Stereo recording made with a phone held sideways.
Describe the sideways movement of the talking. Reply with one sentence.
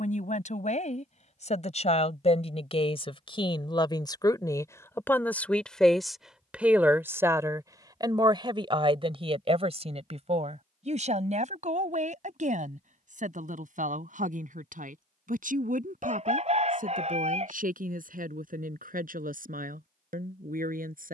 In this clip you hear the talking go from the left side to the right.